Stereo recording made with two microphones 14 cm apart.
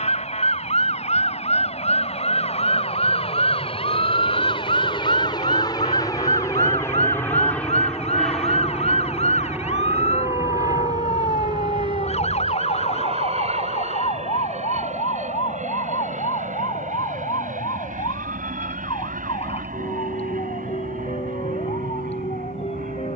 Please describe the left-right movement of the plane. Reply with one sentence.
In this clip you hear the plane go from the left side to the right.